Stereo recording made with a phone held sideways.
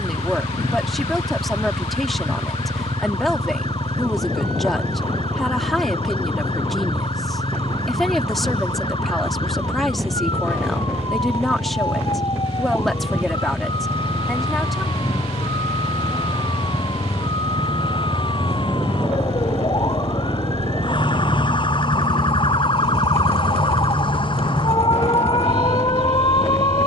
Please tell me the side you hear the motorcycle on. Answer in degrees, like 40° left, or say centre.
50° right.